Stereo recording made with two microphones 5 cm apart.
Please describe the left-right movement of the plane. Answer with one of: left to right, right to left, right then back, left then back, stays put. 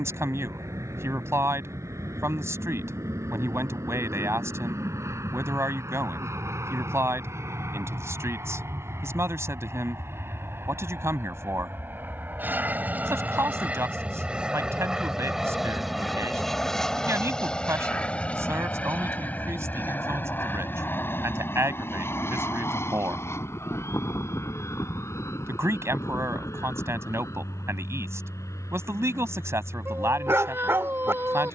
right to left.